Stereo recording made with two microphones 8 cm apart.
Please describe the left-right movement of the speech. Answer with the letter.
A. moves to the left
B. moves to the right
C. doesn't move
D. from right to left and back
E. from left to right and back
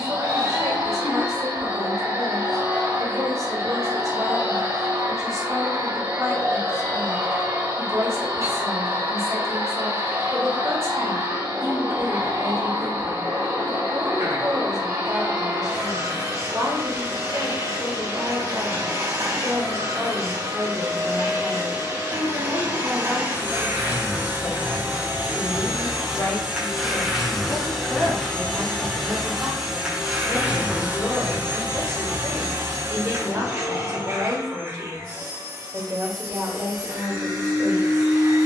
D.